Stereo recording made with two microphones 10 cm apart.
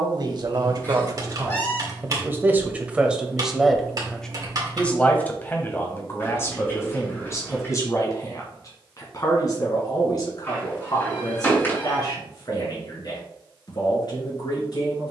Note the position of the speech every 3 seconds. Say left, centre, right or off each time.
right, centre, left, left, left.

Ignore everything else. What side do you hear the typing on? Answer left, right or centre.
right.